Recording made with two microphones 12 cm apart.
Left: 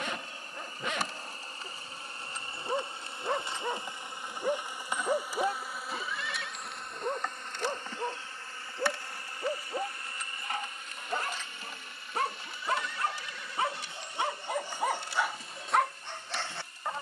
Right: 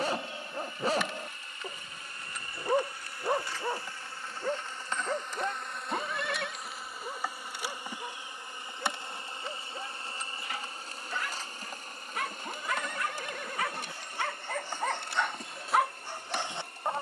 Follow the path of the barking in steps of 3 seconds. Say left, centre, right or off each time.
right, centre, left, left, left, centre.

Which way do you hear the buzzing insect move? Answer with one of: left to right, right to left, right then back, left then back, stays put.
left to right.